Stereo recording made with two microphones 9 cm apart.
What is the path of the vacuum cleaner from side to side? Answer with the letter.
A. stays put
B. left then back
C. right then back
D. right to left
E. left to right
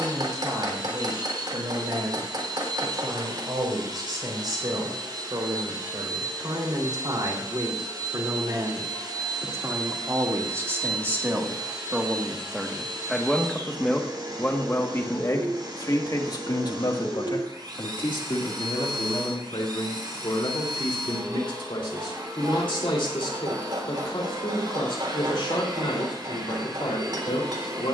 A.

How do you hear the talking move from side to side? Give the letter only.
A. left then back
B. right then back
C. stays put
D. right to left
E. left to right
D.